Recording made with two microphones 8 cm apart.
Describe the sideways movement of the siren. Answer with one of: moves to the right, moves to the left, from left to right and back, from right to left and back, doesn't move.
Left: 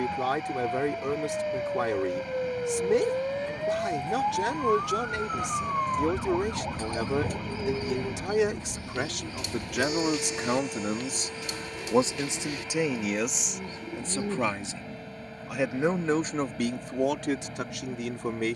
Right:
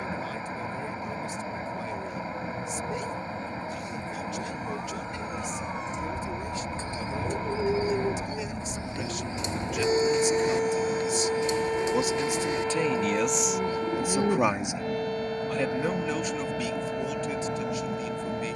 moves to the right.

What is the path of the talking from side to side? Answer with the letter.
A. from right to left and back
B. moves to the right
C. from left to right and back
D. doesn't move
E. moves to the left
C.